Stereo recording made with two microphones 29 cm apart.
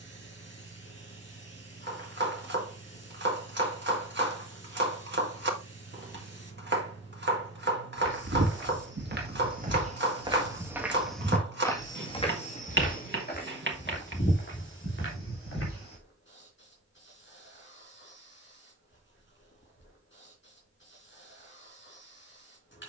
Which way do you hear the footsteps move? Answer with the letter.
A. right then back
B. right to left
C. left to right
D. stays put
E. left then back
B.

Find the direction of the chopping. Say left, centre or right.
right.